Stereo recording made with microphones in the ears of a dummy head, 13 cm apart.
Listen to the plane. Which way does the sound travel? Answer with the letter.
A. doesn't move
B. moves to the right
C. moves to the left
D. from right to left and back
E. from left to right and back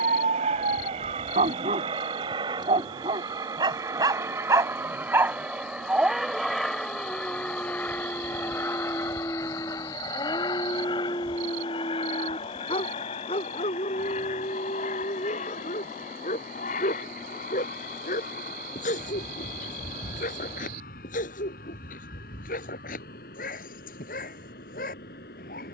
C.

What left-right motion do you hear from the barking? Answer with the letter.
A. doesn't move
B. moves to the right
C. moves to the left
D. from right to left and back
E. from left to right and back
C.